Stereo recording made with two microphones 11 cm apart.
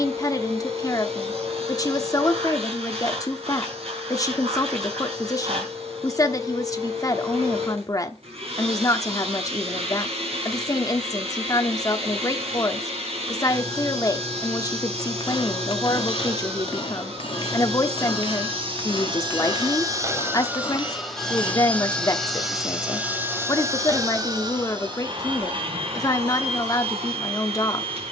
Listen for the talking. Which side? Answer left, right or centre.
left.